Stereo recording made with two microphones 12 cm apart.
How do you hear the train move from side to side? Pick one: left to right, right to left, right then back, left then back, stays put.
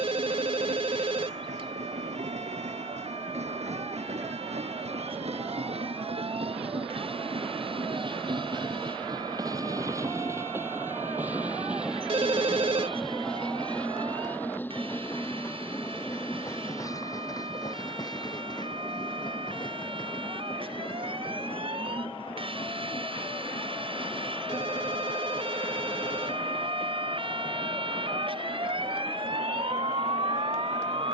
right to left.